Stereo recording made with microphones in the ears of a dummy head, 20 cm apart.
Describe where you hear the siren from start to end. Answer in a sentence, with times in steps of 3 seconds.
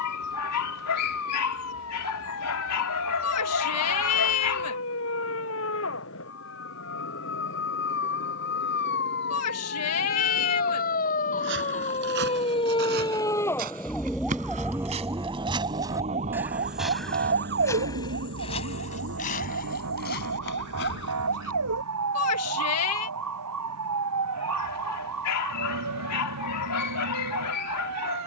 You can hear the siren on the left from 0 s, in the centre from 12 s and on the right from 15 s.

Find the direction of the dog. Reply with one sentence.
You can hear the dog on the left.